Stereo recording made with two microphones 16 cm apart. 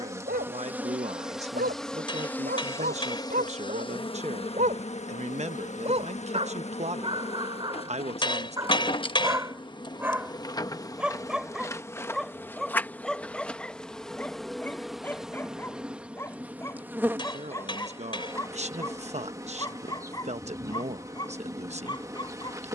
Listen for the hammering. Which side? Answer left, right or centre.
left.